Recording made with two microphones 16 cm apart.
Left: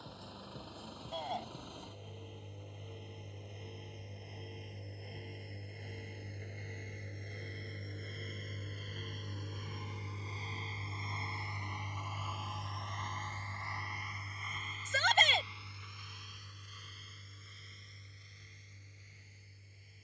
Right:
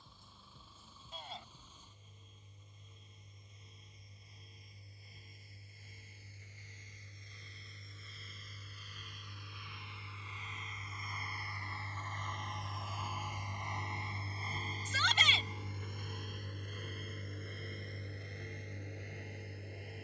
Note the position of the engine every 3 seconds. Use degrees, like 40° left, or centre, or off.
70° left, 70° left, 60° left, 30° left, 10° right, 50° right, 70° right.